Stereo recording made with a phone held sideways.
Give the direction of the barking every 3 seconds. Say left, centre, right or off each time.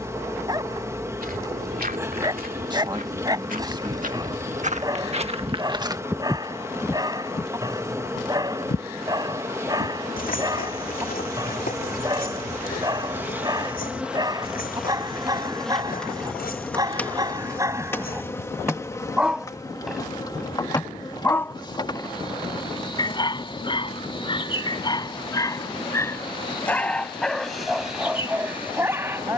right, right, right, right, right, right, centre, left, left, centre.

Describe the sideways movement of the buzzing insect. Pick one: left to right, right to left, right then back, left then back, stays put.
right to left.